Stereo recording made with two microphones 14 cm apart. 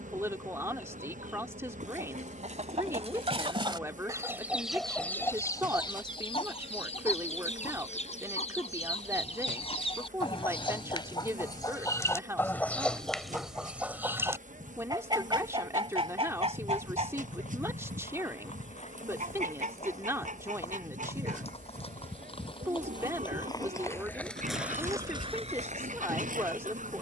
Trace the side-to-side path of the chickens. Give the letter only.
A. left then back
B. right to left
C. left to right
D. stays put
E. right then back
A.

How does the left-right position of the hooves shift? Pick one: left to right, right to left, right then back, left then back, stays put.
left to right.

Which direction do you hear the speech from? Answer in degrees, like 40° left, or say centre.
20° right.